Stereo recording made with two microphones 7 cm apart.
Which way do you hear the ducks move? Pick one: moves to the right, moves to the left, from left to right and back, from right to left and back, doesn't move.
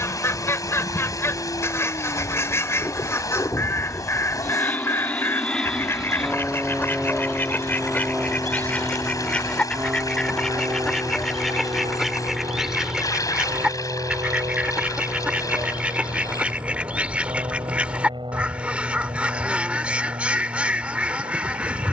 moves to the right.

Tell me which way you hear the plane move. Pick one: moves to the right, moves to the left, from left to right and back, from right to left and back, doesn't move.
moves to the right.